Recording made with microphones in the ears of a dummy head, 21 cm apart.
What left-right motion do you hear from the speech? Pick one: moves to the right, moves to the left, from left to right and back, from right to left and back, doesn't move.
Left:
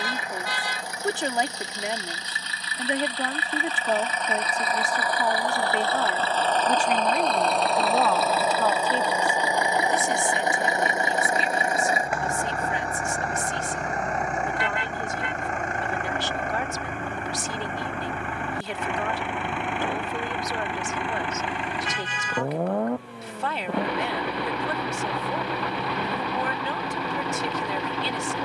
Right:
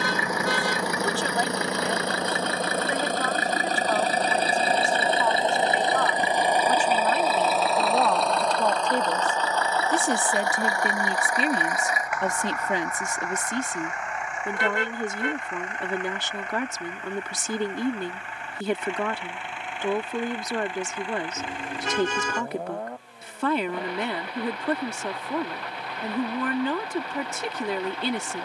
moves to the right.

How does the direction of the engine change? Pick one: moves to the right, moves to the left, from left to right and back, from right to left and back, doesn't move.
moves to the left.